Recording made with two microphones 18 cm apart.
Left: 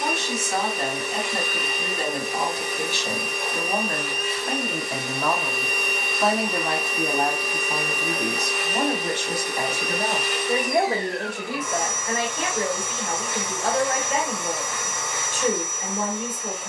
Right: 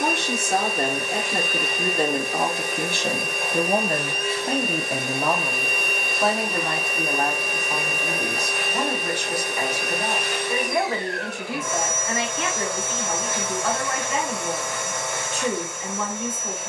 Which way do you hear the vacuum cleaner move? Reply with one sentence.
In this clip you hear the vacuum cleaner stay in one place.